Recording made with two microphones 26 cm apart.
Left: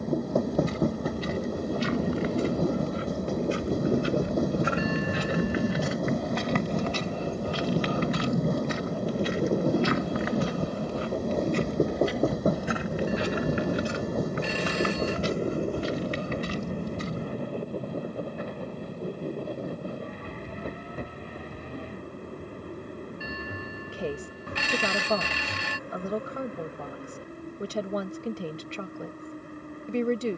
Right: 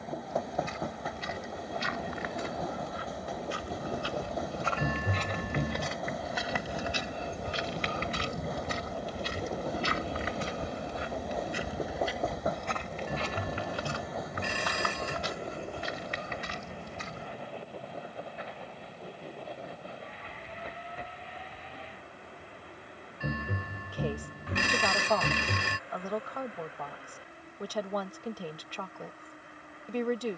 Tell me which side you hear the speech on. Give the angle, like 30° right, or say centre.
30° left.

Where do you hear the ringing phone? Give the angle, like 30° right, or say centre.
60° right.